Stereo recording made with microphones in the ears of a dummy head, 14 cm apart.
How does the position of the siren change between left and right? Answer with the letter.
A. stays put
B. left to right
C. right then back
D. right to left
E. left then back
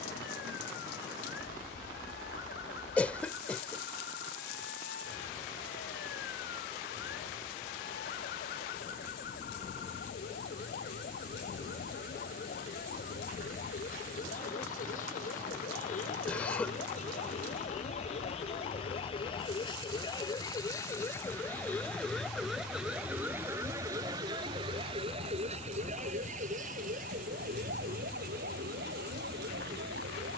B.